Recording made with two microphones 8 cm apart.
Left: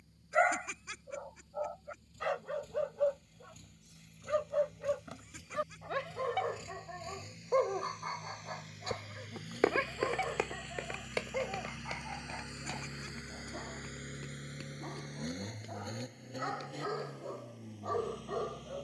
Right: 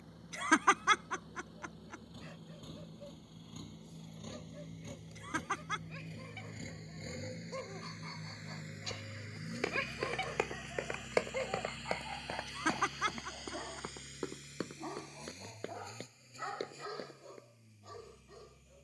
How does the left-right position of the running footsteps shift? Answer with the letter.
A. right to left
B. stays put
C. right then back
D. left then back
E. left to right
E.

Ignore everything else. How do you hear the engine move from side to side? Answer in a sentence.
You can hear the engine move from right to left.